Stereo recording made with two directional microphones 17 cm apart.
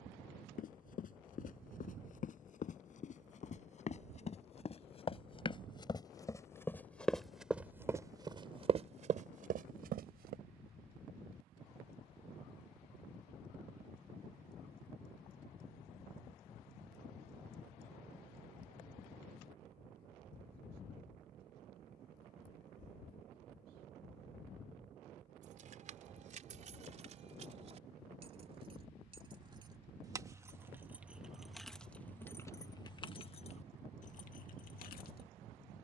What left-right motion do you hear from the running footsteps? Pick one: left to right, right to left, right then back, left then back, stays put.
left to right.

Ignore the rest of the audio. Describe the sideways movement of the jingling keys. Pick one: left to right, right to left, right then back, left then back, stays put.
right to left.